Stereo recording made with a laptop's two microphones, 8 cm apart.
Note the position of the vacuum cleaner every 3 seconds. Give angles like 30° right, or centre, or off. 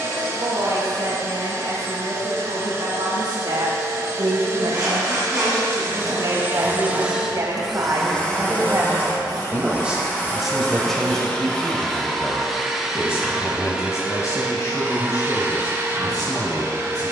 40° right, 40° right, 10° right, 20° left, 10° right, 30° right.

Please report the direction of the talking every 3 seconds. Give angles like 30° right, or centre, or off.
80° right, 70° right, 50° right, centre, 40° left, 50° left.